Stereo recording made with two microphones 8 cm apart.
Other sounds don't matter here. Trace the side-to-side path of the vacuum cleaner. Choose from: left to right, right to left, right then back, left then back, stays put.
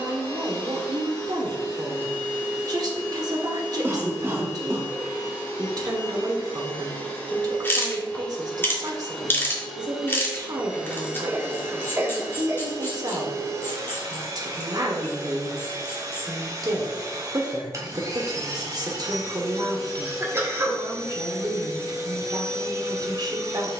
left to right.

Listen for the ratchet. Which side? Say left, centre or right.
left.